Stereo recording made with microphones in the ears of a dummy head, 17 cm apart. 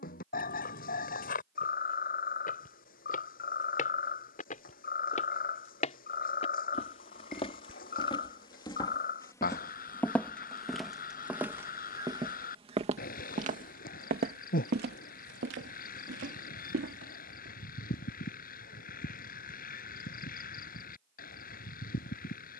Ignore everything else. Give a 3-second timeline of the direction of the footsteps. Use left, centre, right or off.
left, left, left, centre, right, right, off, off.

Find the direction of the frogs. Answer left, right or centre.
left.